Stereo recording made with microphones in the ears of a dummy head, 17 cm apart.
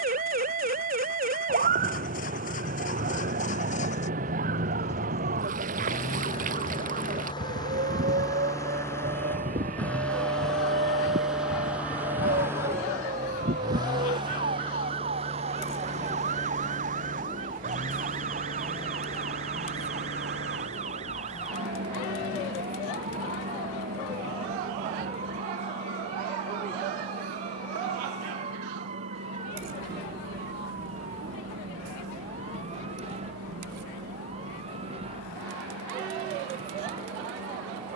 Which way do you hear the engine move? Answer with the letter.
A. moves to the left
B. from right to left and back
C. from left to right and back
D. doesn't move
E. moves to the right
E.